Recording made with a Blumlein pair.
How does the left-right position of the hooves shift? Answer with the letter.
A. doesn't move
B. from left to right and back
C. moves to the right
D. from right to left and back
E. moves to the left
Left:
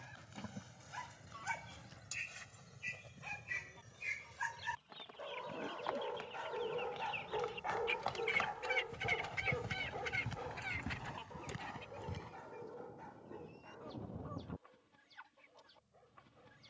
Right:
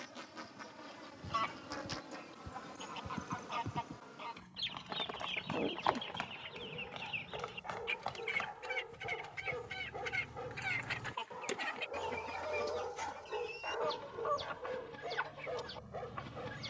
E.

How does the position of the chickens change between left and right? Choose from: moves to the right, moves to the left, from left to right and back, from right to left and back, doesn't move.
from right to left and back.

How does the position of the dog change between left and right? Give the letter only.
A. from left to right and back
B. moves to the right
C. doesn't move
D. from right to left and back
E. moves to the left
B.